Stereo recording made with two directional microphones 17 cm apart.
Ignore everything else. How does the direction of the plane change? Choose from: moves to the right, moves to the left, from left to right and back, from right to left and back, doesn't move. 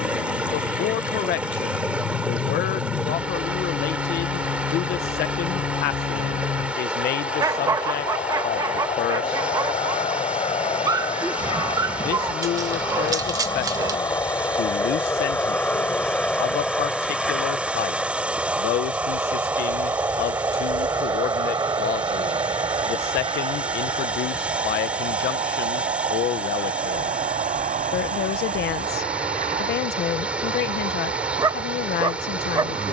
moves to the right.